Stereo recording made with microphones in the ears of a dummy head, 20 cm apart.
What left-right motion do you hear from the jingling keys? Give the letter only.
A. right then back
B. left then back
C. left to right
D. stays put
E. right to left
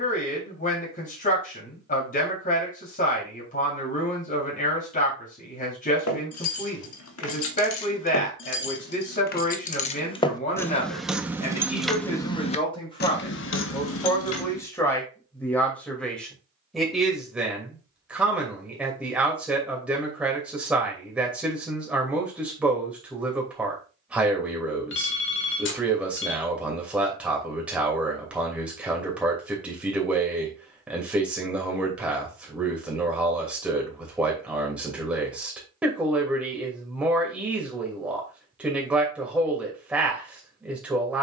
A.